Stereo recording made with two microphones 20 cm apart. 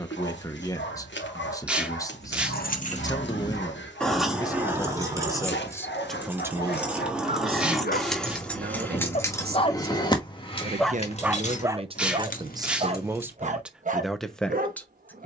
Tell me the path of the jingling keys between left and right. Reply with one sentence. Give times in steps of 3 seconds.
In this clip you hear the jingling keys on the left from 0 s, in the centre from 3 s and on the left from 9 s.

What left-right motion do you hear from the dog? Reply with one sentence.
You can hear the dog move to the right.